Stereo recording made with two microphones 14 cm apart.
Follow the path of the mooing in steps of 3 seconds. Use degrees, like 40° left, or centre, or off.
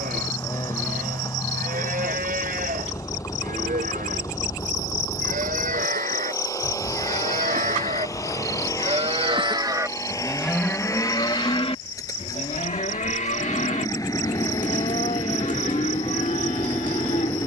80° right, 80° right, 60° right, centre, 60° left, 60° left.